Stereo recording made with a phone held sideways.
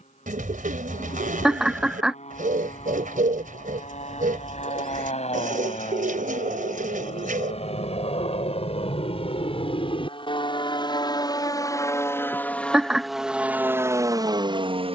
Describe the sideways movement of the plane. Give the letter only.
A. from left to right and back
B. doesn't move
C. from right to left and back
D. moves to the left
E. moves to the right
E.